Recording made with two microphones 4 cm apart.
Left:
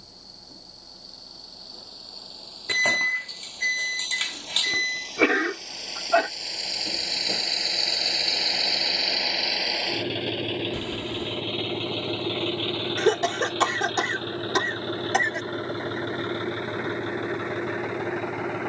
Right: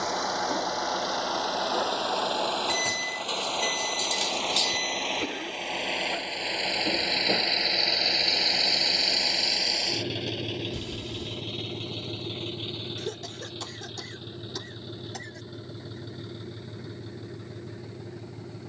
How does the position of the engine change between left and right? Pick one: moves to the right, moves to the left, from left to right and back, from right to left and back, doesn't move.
moves to the left.